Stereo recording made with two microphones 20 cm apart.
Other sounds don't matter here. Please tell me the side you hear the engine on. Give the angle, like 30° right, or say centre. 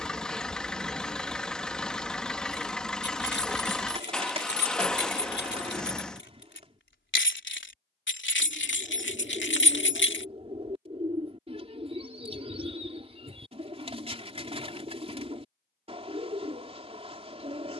centre.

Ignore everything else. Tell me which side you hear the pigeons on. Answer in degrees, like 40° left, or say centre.
30° right.